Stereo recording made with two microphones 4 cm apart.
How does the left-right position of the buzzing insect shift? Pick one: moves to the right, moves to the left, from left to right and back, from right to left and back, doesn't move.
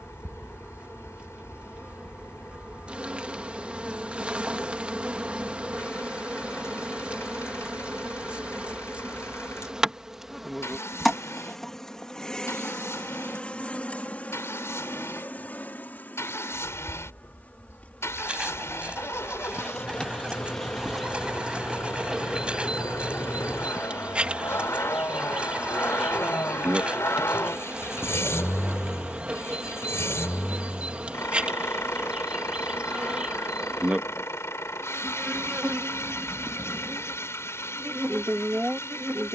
from right to left and back.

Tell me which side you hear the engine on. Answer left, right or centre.
left.